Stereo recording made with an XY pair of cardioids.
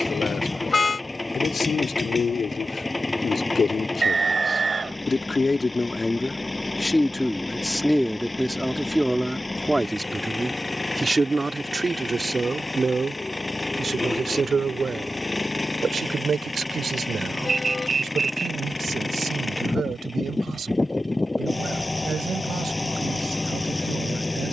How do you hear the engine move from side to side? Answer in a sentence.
In this clip you hear the engine stay put.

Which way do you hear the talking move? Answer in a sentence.
You can hear the talking travel towards the right.